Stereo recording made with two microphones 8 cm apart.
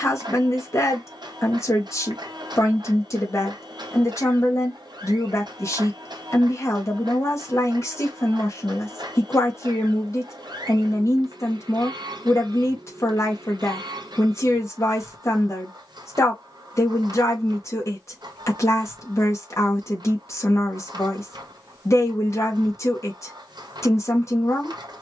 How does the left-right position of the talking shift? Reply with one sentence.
In this clip you hear the talking stay in one place.